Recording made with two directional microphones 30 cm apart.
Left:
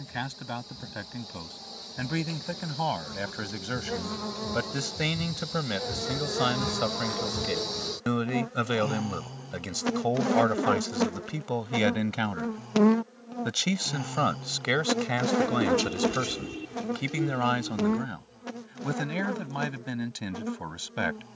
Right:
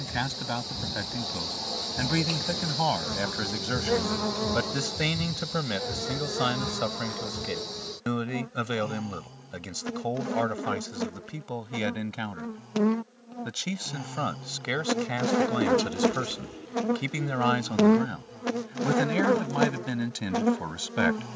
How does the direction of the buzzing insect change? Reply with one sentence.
In this clip you hear the buzzing insect move from right to left and back again.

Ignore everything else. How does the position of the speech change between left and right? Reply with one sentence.
In this clip you hear the speech move from right to left and back again.